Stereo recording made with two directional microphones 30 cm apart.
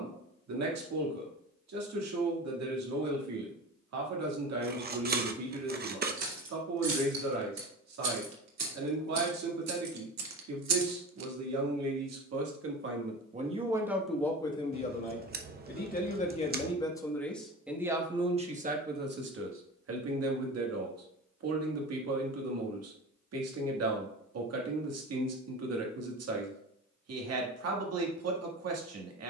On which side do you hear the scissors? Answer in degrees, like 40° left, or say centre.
30° right.